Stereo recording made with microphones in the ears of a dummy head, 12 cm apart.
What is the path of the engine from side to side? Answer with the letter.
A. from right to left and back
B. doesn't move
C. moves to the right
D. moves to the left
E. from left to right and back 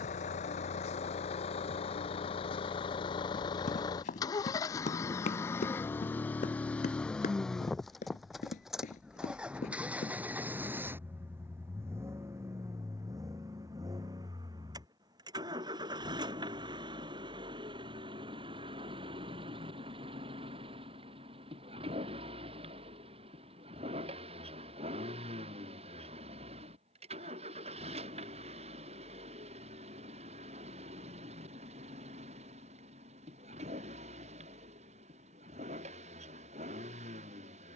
C.